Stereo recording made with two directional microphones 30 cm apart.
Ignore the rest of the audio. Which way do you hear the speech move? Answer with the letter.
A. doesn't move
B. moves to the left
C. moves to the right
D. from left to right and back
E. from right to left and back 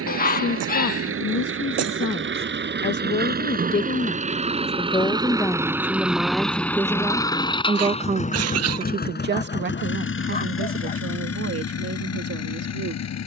C.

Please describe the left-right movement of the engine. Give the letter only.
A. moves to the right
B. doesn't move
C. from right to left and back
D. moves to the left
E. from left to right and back
D.